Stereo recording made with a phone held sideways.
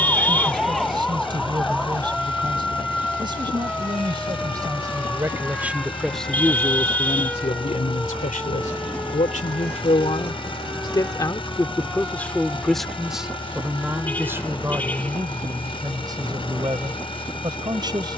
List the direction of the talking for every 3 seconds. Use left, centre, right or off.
right, right, left, left, centre, right.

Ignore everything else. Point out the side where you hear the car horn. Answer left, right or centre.
centre.